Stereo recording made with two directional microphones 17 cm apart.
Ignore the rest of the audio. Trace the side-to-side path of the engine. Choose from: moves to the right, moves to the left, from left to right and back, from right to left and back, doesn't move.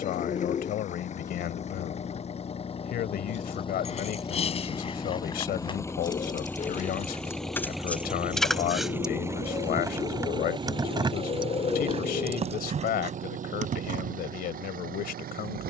moves to the right.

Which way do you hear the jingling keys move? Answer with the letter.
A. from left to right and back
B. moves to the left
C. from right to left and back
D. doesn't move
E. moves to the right
E.